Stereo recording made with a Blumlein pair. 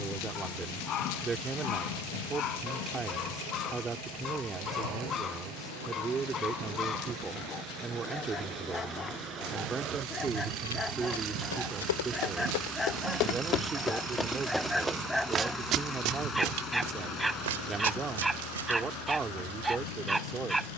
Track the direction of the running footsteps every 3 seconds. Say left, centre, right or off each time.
off, off, off, left, left, right, right.